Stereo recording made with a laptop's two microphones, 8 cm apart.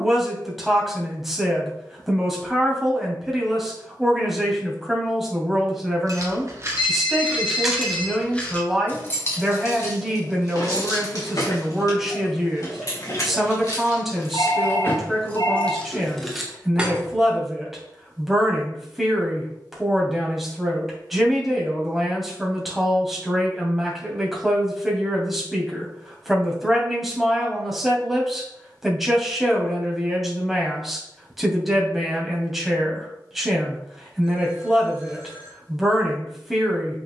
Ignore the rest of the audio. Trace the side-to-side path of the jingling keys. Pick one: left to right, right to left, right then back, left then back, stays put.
left then back.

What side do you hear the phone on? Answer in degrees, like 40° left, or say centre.
80° left.